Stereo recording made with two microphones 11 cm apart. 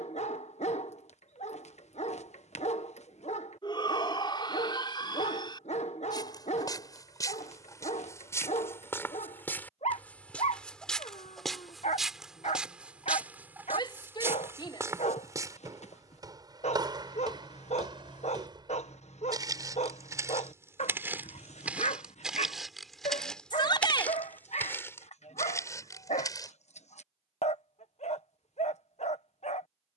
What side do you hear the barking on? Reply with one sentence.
In this clip you hear the barking on the left.